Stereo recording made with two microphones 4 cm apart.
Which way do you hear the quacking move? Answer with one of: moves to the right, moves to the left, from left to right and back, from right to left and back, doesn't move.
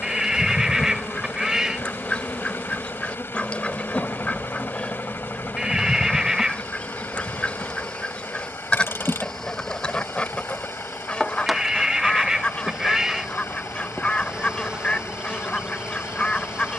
doesn't move.